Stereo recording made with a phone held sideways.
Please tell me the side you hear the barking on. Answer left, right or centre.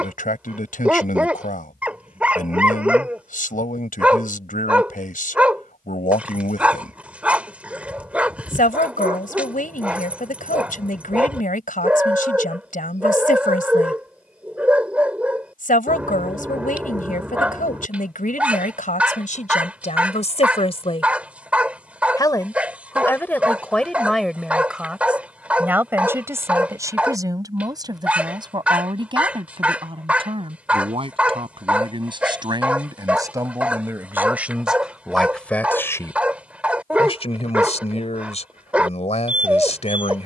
centre.